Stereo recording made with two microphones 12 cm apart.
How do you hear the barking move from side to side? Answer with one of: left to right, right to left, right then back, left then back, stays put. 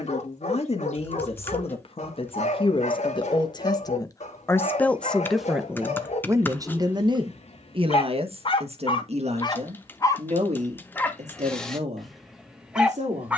left to right.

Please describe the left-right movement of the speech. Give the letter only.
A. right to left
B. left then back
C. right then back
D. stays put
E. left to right
E.